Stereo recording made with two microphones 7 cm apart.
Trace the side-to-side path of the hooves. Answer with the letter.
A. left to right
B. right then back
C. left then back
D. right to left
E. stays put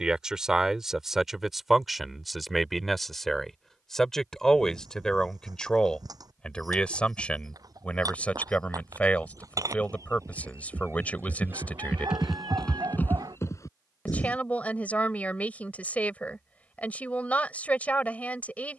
D.